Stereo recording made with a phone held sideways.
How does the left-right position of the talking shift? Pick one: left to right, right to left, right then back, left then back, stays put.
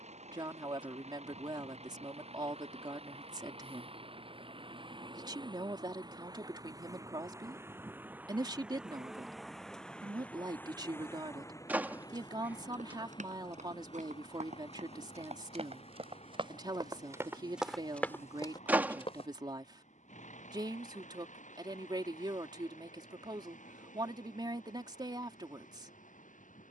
stays put.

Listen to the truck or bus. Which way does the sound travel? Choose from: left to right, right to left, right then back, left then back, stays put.
right to left.